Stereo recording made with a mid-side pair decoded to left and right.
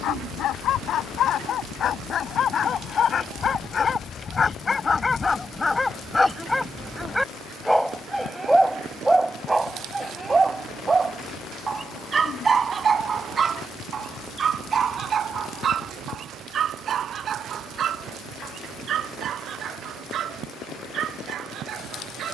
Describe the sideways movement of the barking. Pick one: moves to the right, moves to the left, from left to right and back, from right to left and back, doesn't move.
moves to the right.